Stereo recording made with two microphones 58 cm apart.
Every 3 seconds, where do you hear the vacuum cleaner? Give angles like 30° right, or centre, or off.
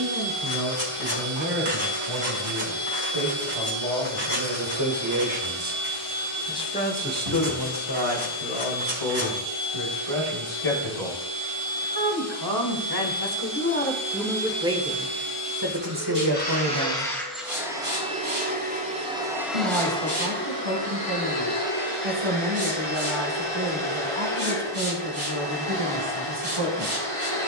60° left, 60° left, 60° left, 60° left, 60° left, 10° left, centre, 50° left, 60° left.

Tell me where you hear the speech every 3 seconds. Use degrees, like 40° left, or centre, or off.
70° right, 50° right, 40° left, 60° left, 20° left, 40° right, 70° right, 70° right, 70° right.